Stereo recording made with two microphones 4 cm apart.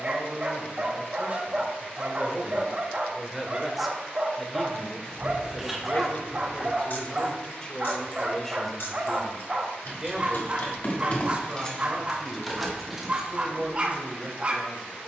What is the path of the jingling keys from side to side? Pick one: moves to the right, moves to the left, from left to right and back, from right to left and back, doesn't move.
from right to left and back.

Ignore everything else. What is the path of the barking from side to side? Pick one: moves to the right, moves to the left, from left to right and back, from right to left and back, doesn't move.
doesn't move.